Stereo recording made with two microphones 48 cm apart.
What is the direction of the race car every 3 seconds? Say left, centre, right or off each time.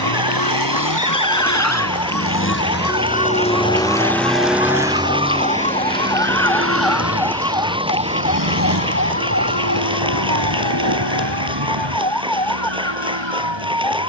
left, centre, right, right, right.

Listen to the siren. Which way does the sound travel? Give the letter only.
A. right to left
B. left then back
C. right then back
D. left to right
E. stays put
D.